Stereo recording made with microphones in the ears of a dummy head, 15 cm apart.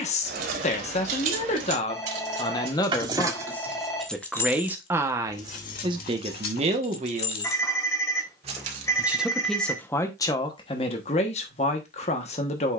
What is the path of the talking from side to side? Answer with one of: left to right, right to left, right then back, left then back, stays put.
right then back.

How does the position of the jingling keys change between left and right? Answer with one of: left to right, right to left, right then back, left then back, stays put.
left then back.